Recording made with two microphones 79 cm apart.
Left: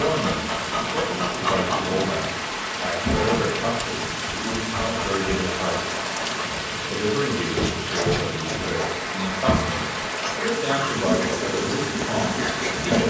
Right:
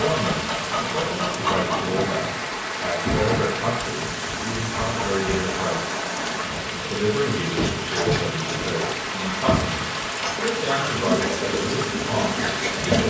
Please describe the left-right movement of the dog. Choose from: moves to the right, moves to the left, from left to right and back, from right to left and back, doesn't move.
from right to left and back.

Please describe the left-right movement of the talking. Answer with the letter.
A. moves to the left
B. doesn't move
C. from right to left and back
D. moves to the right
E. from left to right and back
B.